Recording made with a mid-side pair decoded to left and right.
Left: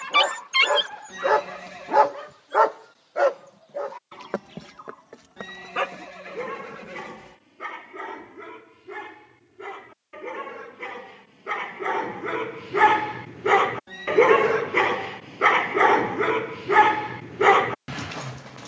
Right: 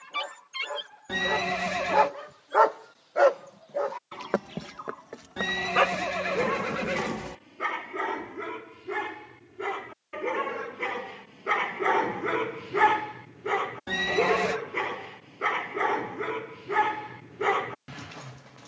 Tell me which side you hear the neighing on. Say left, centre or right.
right.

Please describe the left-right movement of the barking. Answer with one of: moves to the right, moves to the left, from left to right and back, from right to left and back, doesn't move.
from left to right and back.